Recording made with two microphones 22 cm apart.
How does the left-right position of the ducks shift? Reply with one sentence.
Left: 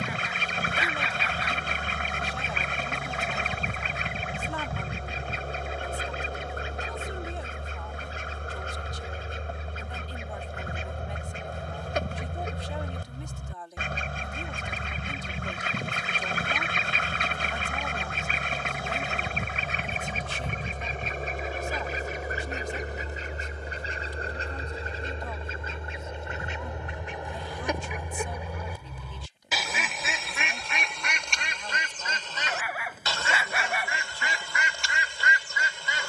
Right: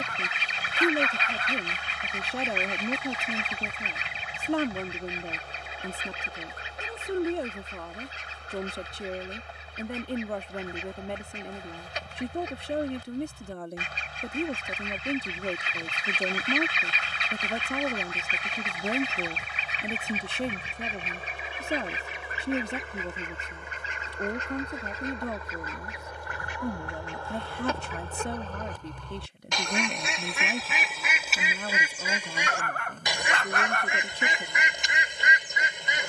In this clip you hear the ducks travel towards the right.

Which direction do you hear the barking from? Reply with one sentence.
You can hear the barking in the centre.